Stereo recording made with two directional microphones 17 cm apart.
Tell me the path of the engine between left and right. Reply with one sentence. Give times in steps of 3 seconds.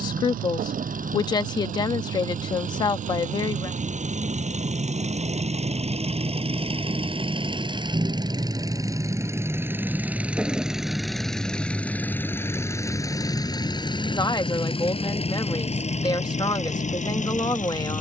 In this clip you hear the engine on the right from 0 s, in the centre from 9 s and on the left from 12 s.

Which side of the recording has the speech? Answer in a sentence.
In this clip you hear the speech on the left.